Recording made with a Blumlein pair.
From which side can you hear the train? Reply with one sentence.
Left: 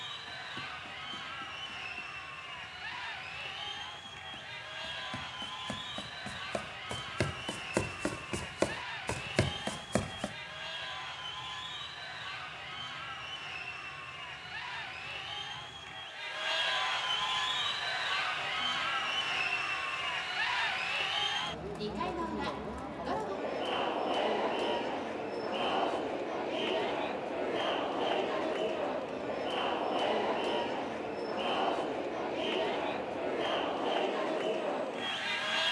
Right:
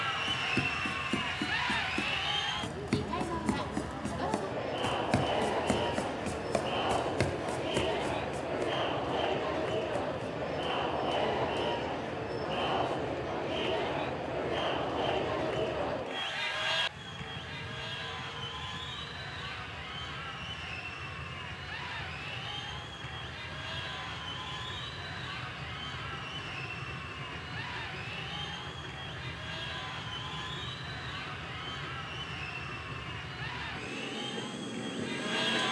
In this clip you hear the train on the right.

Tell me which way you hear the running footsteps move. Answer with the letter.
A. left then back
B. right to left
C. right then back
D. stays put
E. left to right
B.